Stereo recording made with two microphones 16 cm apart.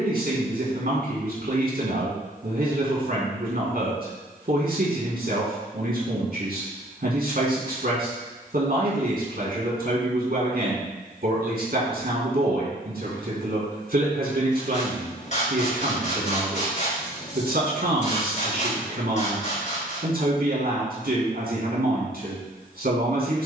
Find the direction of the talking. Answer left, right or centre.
right.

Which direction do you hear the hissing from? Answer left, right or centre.
left.